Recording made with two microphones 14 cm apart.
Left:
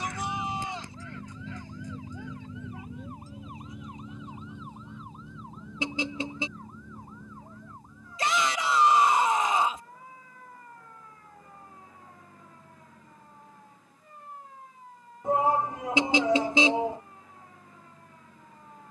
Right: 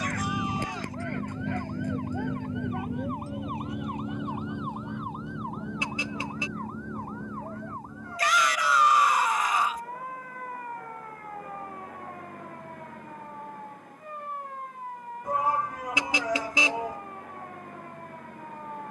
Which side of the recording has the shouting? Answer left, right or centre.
left.